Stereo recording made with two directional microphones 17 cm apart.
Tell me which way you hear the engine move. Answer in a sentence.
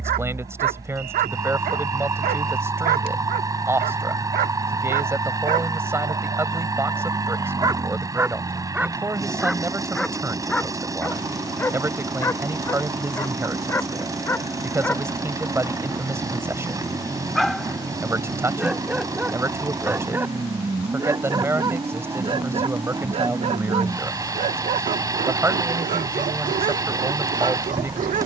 You can hear the engine stay put.